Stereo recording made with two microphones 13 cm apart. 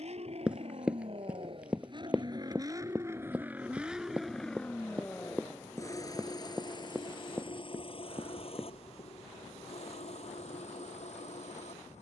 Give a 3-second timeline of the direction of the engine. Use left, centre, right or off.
right, centre, left, left.